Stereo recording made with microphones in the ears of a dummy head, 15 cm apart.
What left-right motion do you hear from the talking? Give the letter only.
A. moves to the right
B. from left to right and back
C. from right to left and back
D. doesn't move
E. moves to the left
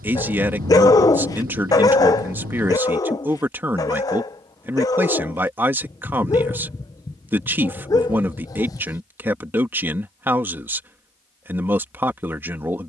D.